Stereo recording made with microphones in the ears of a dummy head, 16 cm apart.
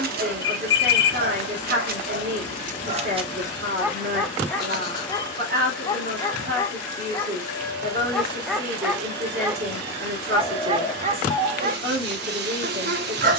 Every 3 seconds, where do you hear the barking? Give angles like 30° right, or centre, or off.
50° right, centre, 10° left, 30° right, 50° right.